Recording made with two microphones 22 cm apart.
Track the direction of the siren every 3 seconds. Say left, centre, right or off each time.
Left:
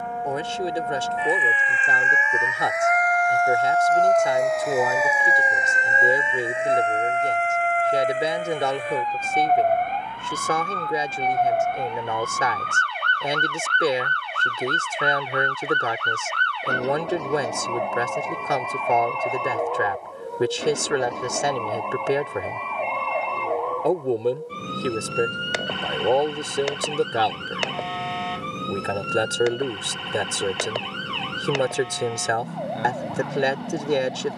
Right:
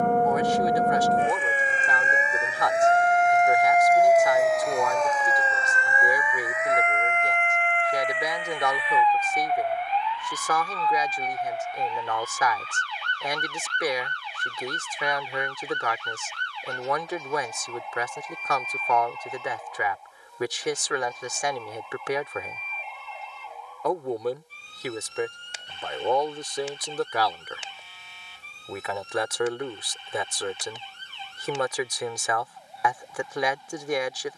right, centre, left, left, left, left, left, left, left, left, left, left.